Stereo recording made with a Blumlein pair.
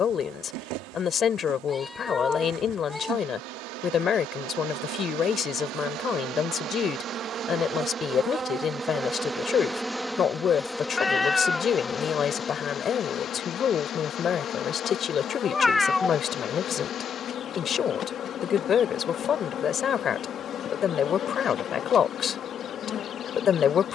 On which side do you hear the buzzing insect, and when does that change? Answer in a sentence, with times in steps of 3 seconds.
In this clip you hear the buzzing insect on the right from 0 s, in the centre from 9 s and on the left from 12 s.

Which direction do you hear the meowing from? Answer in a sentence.
In this clip you hear the meowing in the centre.